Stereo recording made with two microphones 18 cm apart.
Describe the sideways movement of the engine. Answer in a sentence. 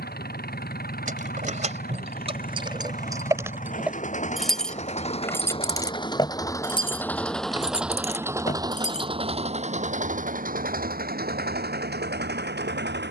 You can hear the engine move to the right.